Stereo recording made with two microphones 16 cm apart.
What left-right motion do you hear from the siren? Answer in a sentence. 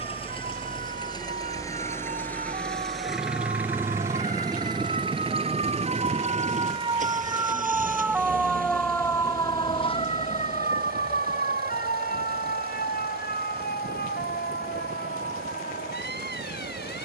You can hear the siren travel towards the left.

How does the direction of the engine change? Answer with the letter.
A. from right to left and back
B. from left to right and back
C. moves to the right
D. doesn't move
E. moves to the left
C.